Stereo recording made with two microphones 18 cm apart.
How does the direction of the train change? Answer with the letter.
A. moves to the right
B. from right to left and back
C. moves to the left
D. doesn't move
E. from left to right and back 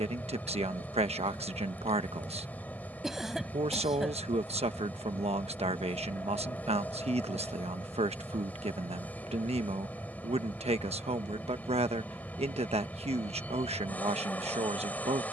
D.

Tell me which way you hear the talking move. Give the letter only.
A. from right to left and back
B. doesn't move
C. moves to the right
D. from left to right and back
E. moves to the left
B.